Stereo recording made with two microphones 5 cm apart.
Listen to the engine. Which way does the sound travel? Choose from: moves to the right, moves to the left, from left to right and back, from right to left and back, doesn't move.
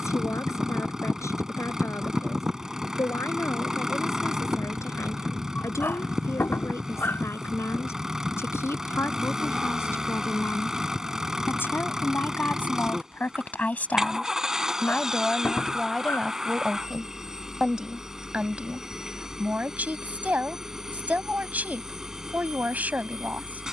doesn't move.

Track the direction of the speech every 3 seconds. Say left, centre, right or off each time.
left, left, left, left, left, centre, right, right.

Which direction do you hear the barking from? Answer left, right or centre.
left.